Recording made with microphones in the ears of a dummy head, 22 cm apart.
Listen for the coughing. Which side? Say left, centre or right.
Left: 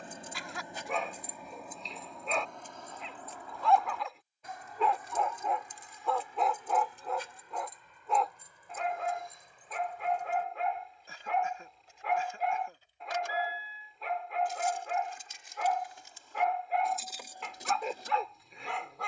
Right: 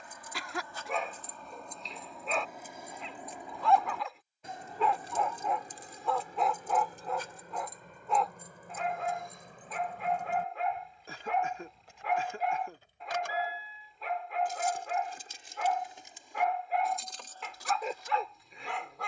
right.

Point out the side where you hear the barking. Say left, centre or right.
centre.